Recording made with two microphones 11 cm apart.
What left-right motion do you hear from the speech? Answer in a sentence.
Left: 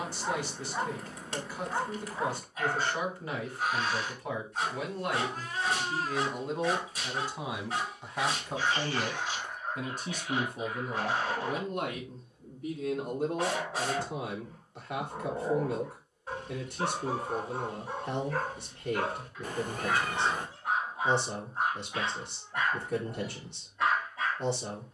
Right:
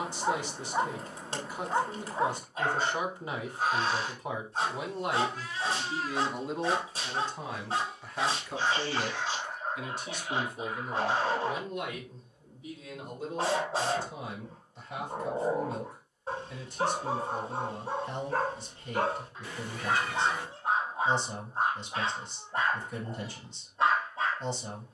You can hear the speech travel towards the left.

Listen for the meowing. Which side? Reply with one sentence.
In this clip you hear the meowing on the left.